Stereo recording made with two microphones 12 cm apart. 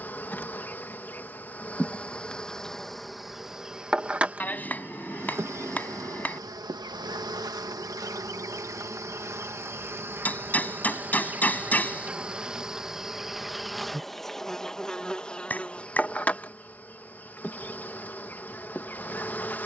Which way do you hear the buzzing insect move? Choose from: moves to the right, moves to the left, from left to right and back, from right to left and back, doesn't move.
from left to right and back.